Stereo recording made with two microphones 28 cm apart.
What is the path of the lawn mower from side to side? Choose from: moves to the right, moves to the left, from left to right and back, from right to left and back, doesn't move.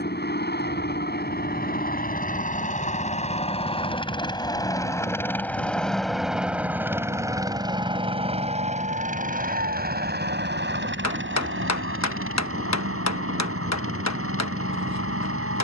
moves to the right.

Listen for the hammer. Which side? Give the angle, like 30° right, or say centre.
70° left.